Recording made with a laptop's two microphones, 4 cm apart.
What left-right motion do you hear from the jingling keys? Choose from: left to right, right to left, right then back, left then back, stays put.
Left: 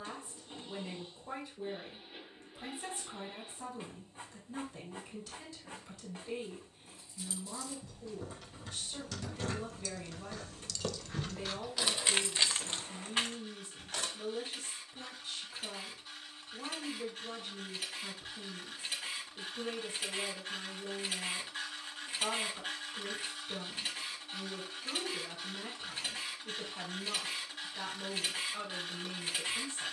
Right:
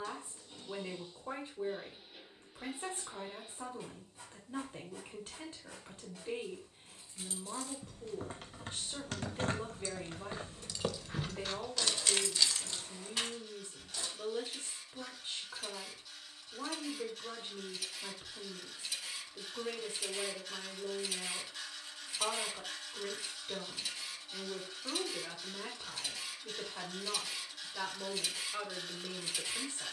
right to left.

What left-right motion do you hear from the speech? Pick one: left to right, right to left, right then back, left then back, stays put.
stays put.